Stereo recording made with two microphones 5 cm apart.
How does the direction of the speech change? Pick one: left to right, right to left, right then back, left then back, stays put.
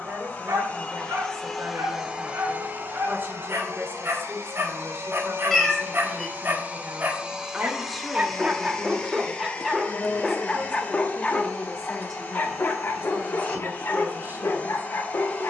left then back.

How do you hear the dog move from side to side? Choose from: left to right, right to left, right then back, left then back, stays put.
right to left.